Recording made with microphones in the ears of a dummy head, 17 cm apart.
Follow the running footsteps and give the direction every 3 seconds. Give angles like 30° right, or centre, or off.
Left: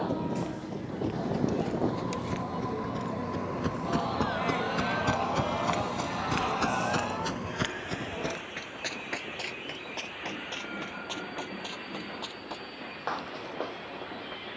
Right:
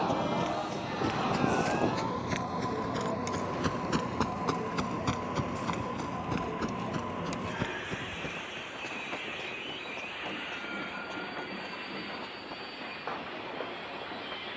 50° right, 10° right, 50° left, 80° left, 80° left.